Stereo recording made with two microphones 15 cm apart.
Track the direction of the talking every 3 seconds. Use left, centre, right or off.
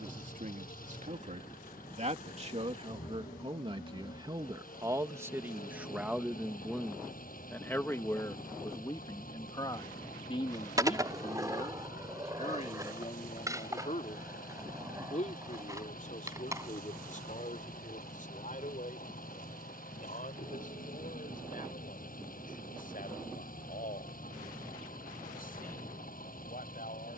right, right, centre, left, left, left, left, left, left.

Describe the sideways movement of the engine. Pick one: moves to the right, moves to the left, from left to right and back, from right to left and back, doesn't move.
doesn't move.